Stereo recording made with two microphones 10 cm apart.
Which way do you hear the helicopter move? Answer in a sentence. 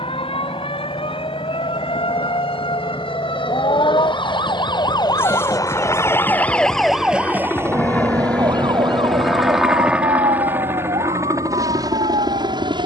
You can hear the helicopter go from the left side to the right.